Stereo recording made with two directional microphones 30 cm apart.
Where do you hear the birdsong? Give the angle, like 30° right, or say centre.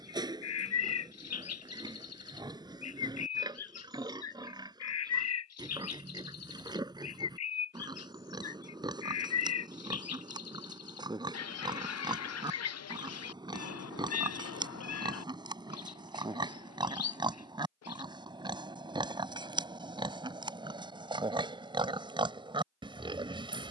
60° left.